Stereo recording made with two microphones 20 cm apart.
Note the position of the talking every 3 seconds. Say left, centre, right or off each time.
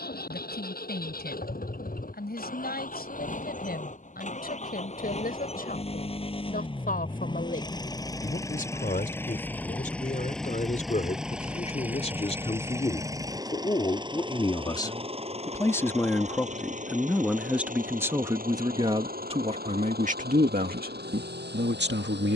left, left, left, left, left, centre, right, right.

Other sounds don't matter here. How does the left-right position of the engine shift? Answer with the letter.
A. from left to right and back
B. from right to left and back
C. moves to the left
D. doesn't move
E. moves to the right
E.